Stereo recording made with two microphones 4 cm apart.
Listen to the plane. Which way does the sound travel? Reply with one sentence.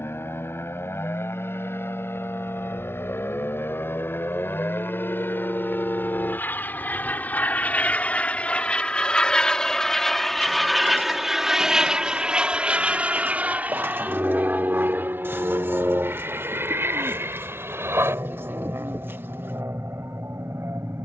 You can hear the plane travel towards the right.